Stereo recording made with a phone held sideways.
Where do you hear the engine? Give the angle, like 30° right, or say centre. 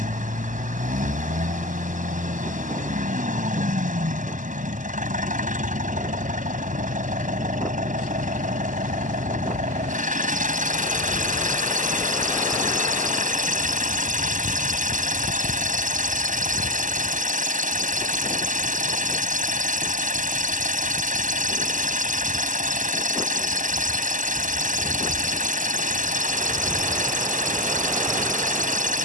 70° right.